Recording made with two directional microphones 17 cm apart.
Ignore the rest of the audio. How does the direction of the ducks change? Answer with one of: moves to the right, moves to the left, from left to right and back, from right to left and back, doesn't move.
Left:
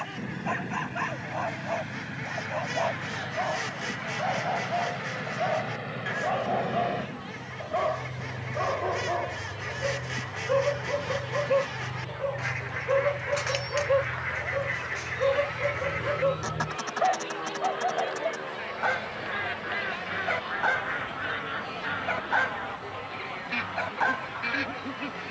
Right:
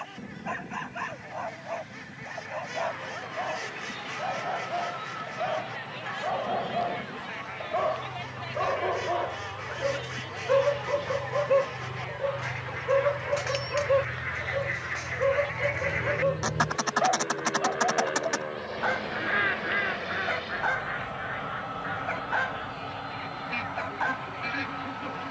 from left to right and back.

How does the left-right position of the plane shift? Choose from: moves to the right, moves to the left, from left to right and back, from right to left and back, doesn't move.
moves to the right.